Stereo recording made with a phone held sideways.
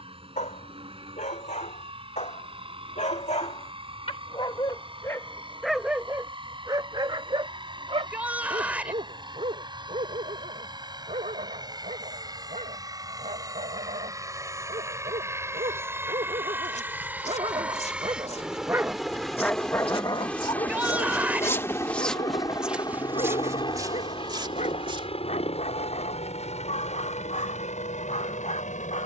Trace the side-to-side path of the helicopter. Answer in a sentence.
In this clip you hear the helicopter go from the right side to the left.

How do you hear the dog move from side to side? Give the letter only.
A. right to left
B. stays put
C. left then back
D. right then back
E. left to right
D.